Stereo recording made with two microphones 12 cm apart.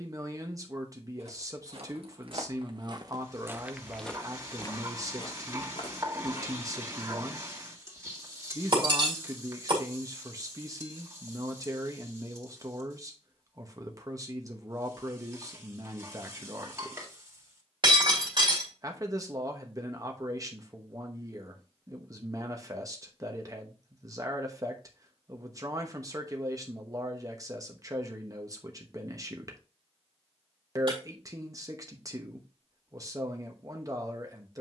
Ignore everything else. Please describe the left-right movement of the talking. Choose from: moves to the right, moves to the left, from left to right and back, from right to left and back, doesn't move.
doesn't move.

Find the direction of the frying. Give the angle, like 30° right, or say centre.
30° right.